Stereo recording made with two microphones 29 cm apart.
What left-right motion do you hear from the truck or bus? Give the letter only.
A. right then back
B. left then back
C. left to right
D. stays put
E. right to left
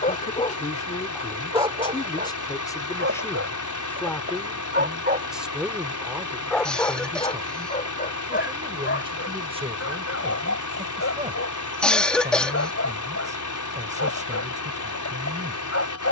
D.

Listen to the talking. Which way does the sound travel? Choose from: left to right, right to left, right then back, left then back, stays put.
left to right.